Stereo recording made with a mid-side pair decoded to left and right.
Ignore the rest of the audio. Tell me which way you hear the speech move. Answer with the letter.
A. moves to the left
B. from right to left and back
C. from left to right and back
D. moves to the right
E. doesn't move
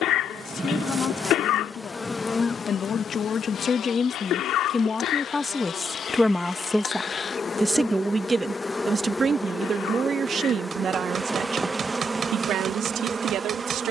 D.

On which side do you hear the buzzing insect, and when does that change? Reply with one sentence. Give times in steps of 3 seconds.
In this clip you hear the buzzing insect in the centre from 0 s, on the left from 3 s, in the centre from 9 s and on the right from 12 s.